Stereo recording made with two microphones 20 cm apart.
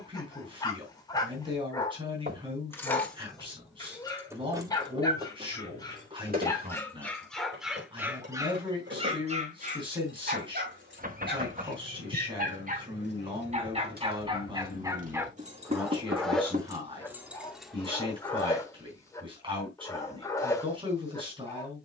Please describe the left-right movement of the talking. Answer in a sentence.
In this clip you hear the talking stay in one place.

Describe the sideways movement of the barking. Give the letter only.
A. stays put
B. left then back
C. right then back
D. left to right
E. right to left
C.